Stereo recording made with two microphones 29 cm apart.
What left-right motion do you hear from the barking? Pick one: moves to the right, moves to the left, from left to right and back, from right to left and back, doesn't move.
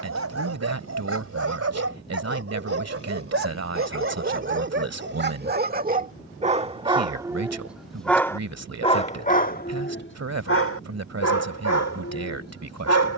moves to the left.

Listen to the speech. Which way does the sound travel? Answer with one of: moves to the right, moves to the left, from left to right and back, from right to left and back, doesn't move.
doesn't move.